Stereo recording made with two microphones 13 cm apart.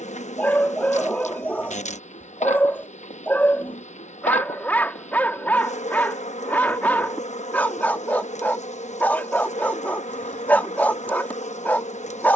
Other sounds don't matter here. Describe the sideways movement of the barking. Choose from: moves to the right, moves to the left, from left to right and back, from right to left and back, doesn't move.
doesn't move.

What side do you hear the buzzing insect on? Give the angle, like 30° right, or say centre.
60° left.